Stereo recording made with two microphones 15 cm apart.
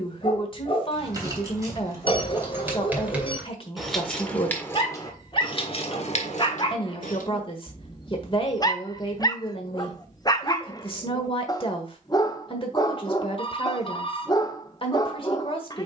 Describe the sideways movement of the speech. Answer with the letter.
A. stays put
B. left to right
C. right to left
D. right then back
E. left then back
A.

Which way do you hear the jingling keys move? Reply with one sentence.
You can hear the jingling keys move to the left.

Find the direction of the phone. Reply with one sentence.
In this clip you hear the phone on the left.